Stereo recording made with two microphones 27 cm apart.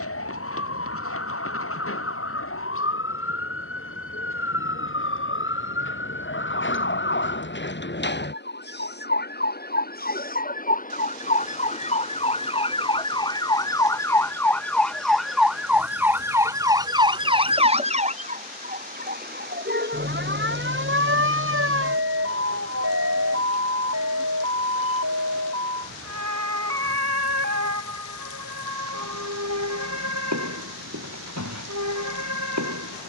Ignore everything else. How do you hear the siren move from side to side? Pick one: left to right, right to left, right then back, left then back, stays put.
left to right.